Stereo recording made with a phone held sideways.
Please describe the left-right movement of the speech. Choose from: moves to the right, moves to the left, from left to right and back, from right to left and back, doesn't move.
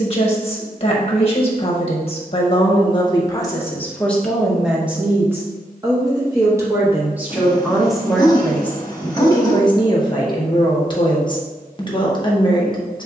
from left to right and back.